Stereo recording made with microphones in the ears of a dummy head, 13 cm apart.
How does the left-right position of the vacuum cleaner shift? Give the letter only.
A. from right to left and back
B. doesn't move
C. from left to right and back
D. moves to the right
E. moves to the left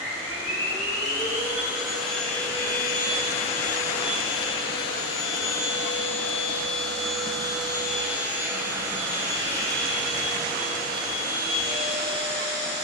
A.